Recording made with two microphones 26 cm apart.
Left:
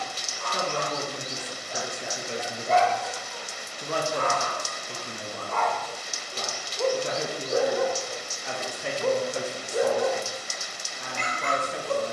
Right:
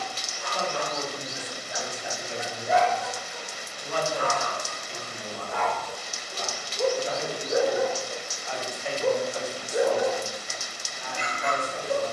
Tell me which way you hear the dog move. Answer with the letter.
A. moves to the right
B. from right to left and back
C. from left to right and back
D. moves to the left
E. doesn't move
E.